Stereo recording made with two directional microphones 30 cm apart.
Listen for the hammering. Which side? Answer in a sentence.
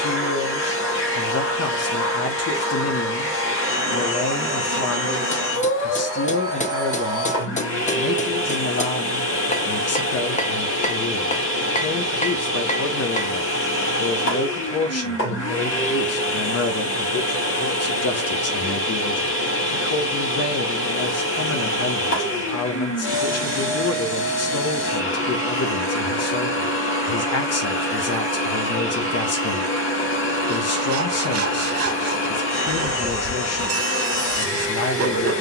You can hear the hammering on the left.